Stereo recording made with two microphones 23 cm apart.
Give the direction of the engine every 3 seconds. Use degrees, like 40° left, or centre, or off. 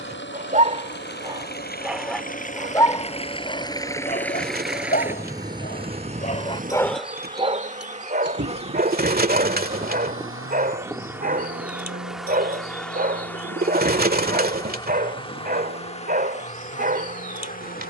50° left, centre, 50° right, 70° right, 70° right, 80° right.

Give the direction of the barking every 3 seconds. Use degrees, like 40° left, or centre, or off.
10° right, 40° left, 20° right, 40° right, 40° right, 40° right.